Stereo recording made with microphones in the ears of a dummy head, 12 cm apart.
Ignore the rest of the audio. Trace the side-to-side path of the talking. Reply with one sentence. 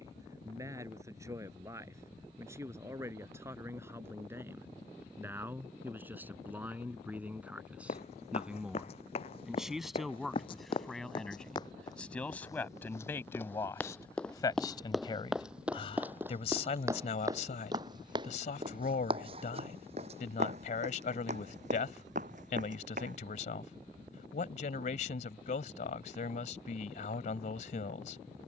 In this clip you hear the talking travel towards the left.